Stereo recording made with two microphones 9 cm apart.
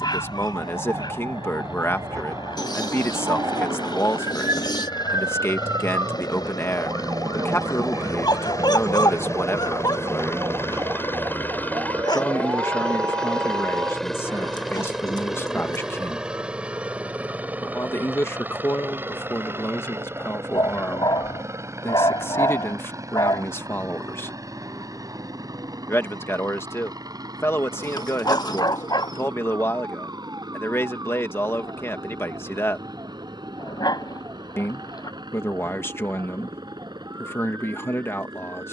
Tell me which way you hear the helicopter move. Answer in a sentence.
You can hear the helicopter move from left to right.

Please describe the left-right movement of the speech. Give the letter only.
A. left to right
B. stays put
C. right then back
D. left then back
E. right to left
B.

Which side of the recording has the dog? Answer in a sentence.
In this clip you hear the dog on the left.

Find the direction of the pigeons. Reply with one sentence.
In this clip you hear the pigeons on the left.